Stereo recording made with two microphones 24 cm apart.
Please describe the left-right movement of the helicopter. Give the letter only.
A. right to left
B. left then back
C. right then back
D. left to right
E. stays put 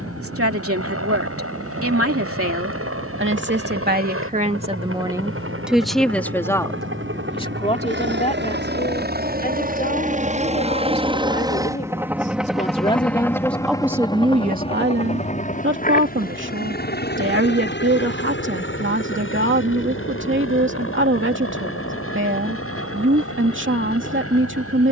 A.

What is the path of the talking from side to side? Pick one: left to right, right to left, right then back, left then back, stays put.
left then back.